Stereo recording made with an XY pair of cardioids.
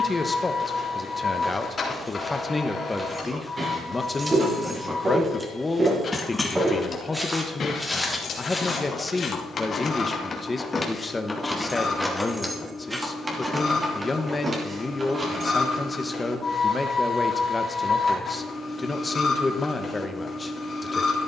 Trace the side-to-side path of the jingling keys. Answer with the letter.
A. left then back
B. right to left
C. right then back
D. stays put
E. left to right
A.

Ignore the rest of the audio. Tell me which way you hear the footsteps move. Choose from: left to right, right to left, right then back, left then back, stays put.
right then back.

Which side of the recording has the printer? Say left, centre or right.
left.